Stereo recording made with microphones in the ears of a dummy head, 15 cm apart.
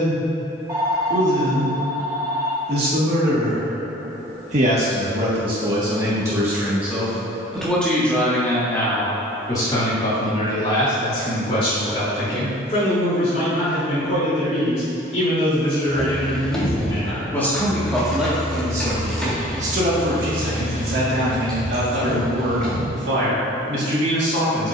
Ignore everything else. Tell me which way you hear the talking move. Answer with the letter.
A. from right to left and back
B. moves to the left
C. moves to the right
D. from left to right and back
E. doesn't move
A.